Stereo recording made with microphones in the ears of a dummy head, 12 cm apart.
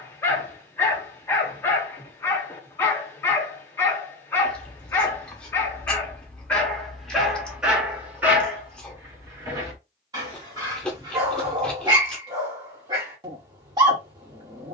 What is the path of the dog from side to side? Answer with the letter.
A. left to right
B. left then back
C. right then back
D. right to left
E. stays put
A.